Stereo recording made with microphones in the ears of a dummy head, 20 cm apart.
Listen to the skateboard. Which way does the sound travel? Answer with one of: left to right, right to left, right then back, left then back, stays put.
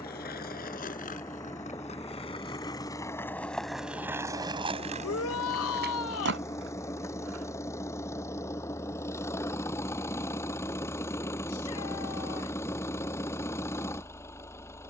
left to right.